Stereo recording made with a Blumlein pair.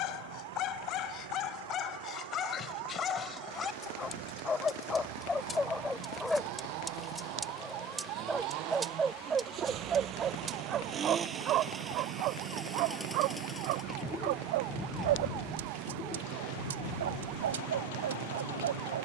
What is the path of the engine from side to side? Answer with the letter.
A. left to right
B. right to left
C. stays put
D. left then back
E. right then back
B.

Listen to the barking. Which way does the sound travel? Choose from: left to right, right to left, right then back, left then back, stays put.
left to right.